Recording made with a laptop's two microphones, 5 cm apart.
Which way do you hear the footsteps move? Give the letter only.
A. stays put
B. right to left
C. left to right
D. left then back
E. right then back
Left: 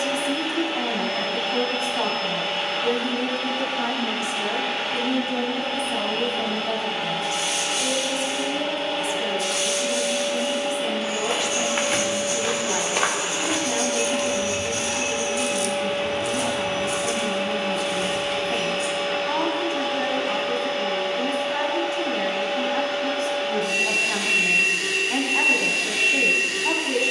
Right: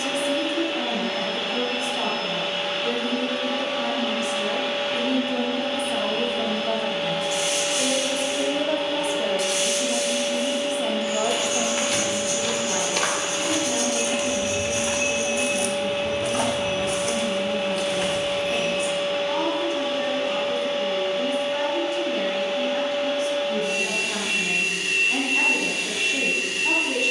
C.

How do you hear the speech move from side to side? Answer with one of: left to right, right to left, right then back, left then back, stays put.
right then back.